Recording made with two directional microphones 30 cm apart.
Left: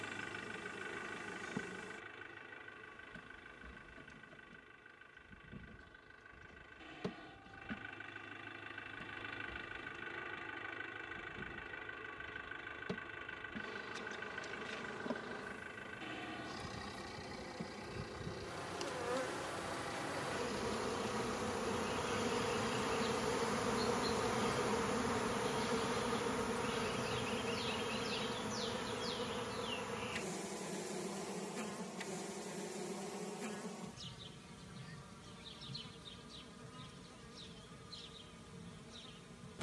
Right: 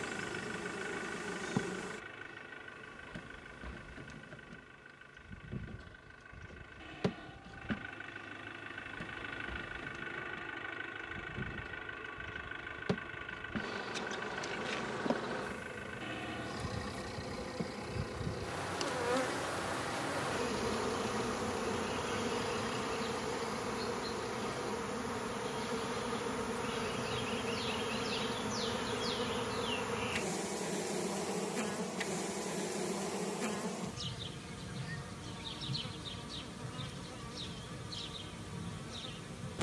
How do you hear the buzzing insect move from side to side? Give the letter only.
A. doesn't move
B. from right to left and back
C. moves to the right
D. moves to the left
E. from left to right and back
B.